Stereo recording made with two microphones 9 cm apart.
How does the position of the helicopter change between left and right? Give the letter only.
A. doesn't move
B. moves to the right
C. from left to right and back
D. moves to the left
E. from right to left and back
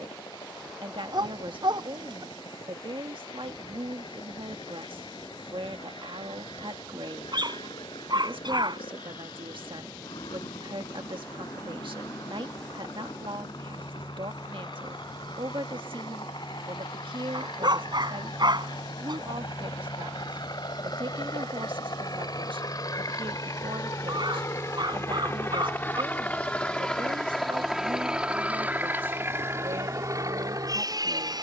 B.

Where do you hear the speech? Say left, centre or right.
right.